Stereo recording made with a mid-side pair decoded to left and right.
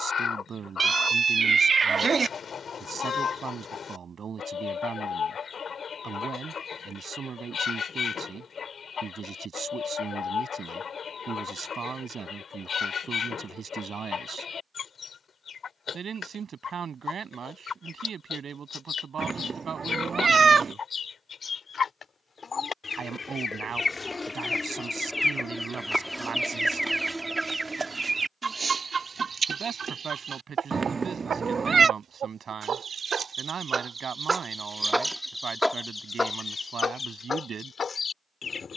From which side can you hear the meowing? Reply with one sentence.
In this clip you hear the meowing on the right.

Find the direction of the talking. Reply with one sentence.
You can hear the talking on the right.